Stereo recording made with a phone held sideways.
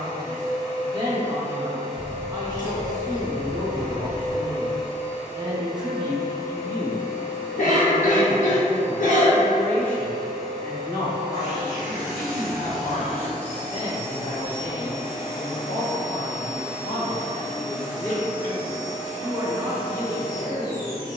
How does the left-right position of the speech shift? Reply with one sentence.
You can hear the speech move from right to left and back again.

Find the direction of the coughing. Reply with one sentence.
You can hear the coughing on the left.